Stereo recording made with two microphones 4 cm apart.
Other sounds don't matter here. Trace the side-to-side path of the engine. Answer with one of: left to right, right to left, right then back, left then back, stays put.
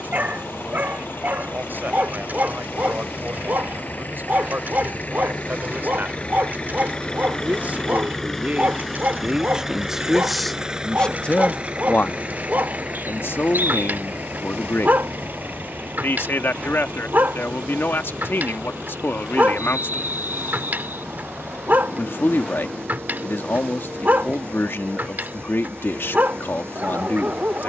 left to right.